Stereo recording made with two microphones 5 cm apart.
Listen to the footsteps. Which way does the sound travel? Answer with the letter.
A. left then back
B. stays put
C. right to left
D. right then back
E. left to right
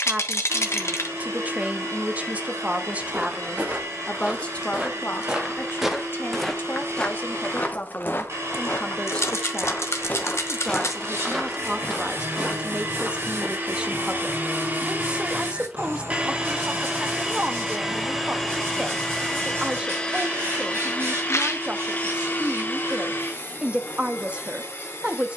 A.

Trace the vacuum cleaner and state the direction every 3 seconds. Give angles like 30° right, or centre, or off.
70° right, 70° right, 60° right, 60° right, 40° right, 20° right, 10° left, 40° left, 50° left.